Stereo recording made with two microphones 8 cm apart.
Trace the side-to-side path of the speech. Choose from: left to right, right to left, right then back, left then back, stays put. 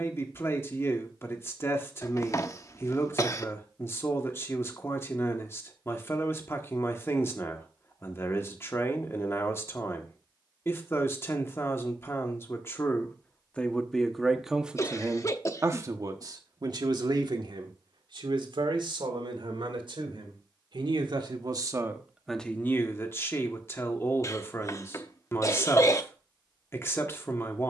right then back.